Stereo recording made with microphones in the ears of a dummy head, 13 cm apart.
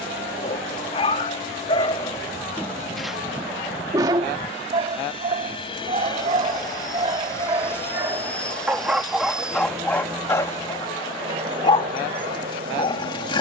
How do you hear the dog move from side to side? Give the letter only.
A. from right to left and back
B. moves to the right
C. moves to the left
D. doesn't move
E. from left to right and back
E.